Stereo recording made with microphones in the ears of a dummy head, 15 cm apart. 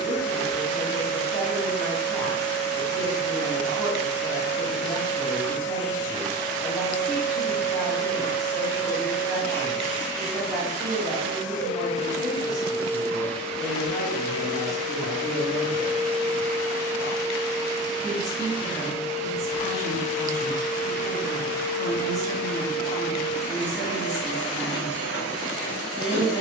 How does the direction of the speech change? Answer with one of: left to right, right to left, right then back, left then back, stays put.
stays put.